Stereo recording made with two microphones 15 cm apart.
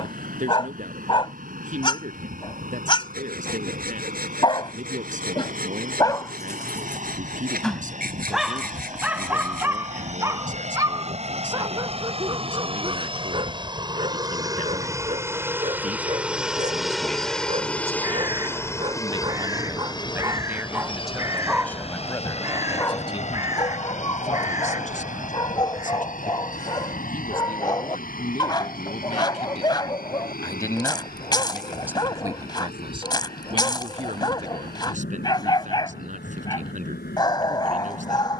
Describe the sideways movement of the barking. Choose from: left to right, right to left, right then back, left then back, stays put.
right then back.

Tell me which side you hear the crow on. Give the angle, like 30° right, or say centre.
20° right.